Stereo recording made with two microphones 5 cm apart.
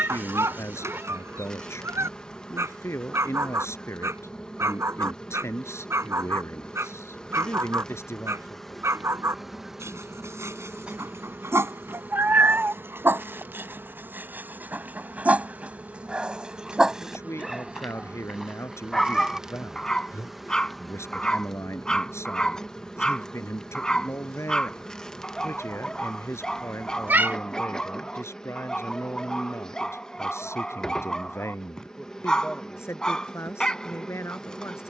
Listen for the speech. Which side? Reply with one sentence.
In this clip you hear the speech on the left.